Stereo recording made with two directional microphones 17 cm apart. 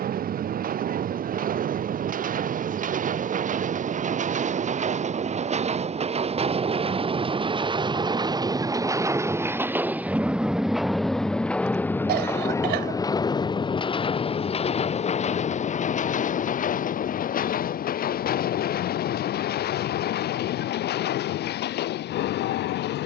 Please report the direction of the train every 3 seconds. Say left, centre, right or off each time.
right, right, right, centre, left, left, left, left.